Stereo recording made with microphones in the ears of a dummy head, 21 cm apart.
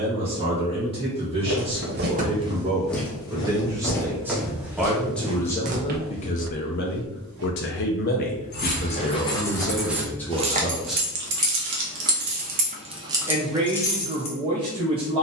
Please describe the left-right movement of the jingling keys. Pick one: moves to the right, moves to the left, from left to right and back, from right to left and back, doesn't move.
from left to right and back.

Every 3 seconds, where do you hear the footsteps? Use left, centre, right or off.
right, centre, right, off, off.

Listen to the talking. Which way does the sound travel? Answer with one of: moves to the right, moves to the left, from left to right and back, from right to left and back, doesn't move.
from right to left and back.